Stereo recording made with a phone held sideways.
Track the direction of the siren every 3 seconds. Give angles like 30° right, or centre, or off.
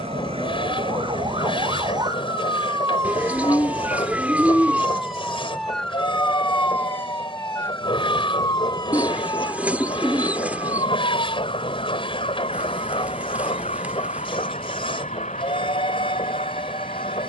30° right, 10° right, 20° left, 30° left, 50° left, 50° left.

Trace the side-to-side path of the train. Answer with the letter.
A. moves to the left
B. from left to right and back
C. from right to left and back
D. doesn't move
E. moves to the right
D.